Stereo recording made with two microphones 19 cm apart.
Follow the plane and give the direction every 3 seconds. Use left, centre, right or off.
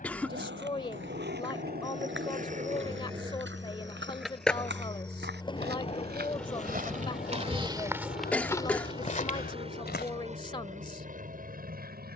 left, left, centre, right.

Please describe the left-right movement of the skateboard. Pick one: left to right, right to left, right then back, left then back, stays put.
right to left.